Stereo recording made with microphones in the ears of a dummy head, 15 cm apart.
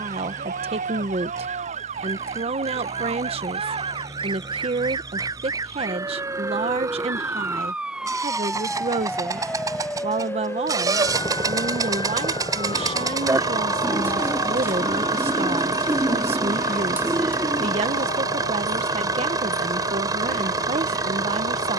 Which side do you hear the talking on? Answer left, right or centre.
right.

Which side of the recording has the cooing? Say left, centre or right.
centre.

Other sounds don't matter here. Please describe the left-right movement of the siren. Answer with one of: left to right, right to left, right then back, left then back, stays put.
right to left.